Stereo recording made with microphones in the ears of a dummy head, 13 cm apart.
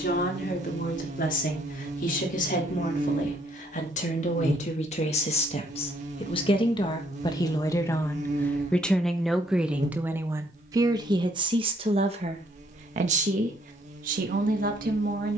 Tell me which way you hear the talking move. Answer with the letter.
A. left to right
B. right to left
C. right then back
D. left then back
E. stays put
A.